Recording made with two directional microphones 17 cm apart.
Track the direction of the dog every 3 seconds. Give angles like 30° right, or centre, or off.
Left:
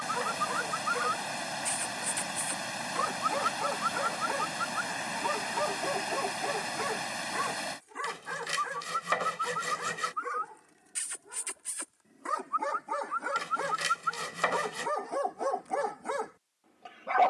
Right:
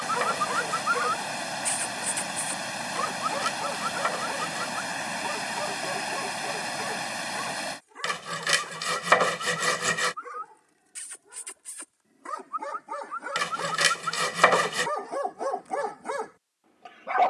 20° right, 10° left, 20° left, 20° left, centre, 10° right.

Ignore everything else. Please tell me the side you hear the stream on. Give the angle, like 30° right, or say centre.
20° right.